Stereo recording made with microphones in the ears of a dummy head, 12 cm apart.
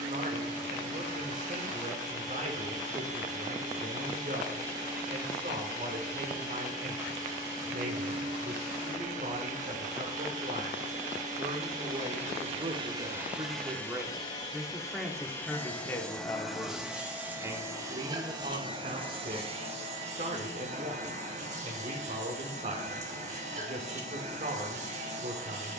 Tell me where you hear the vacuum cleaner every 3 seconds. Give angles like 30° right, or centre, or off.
60° right, 60° right, 60° right, 60° right, 10° right, centre, 40° right, 50° right, 50° right.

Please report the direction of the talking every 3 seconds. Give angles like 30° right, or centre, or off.
50° right, 50° right, 50° right, 50° right, 20° right, centre, 50° right, 50° right, 50° right.